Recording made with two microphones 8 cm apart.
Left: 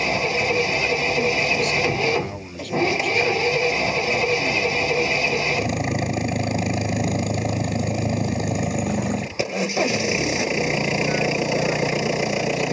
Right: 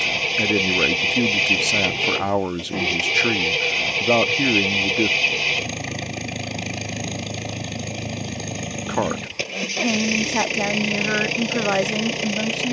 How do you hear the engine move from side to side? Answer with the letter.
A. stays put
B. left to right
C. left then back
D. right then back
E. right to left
A.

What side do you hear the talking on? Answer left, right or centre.
right.